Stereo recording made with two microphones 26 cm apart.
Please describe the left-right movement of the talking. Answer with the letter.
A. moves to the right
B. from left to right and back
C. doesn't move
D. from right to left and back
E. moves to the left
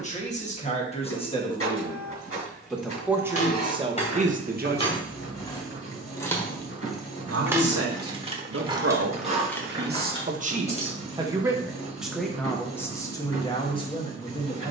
B.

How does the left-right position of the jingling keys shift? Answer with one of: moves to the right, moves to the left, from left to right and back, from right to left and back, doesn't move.
from left to right and back.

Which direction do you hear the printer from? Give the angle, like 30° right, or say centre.
60° left.